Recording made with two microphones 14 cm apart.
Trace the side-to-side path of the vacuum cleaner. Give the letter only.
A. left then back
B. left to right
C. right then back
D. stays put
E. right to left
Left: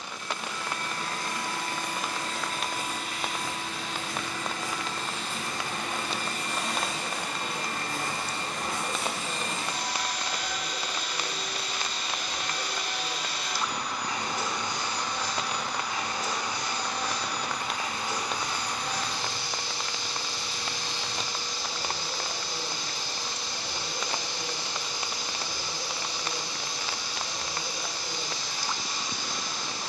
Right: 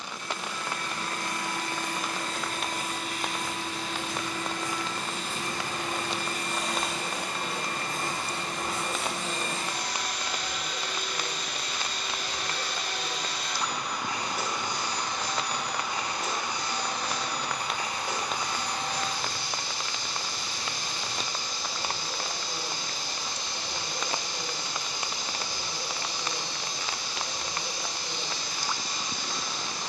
A.